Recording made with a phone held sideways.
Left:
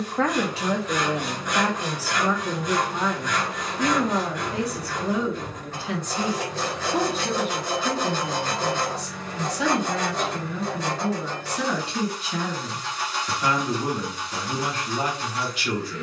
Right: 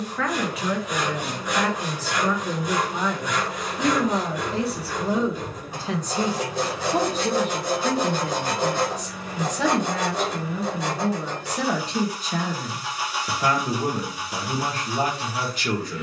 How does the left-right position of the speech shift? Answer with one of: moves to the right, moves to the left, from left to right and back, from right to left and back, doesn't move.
moves to the right.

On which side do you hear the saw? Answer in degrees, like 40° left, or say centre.
10° right.